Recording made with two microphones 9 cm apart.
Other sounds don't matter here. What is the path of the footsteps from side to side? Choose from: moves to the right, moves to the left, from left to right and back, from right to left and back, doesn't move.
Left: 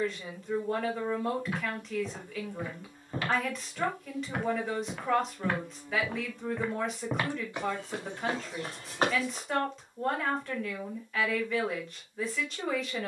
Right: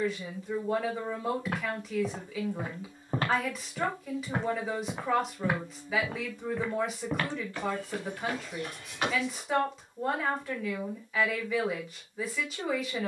moves to the left.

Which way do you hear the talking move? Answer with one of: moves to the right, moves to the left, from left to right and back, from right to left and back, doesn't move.
doesn't move.